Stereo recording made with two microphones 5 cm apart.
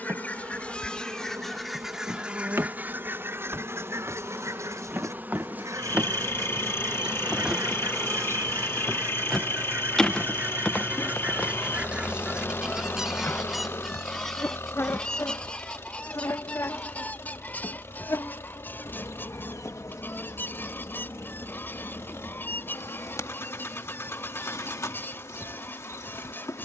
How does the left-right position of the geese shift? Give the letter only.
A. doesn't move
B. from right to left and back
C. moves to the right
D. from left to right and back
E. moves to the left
D.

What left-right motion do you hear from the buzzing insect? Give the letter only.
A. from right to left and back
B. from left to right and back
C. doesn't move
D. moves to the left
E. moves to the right
D.